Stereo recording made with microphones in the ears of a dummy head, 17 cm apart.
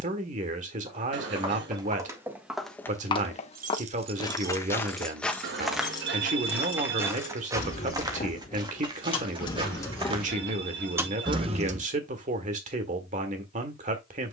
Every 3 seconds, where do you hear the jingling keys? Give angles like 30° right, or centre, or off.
off, 10° right, 30° left, centre, off.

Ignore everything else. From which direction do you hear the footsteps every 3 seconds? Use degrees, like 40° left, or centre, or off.
20° right, 10° left, 20° right, 30° right, off.